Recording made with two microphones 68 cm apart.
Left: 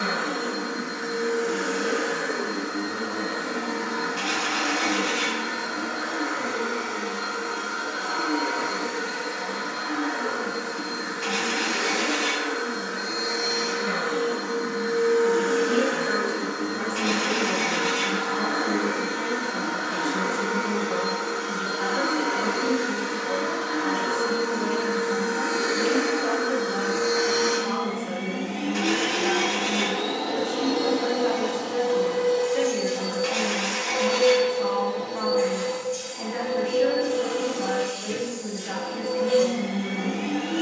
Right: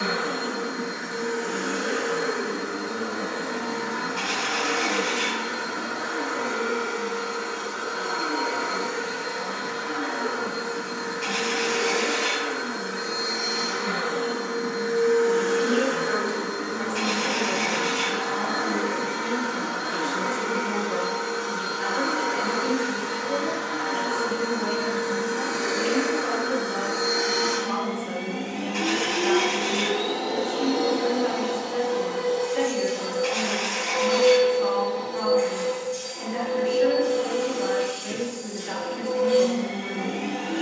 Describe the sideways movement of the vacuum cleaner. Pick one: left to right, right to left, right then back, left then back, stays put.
right to left.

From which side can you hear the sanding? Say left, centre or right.
right.